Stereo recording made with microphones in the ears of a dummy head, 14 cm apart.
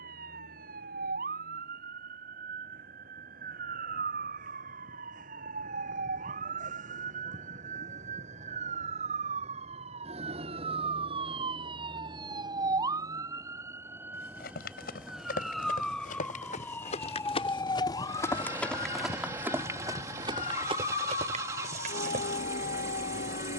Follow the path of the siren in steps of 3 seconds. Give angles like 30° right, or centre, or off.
70° right, 60° right, 50° right, 40° right, 20° right, 10° left, 40° left, 50° left.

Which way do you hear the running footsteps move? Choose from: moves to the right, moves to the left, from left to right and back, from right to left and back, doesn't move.
moves to the right.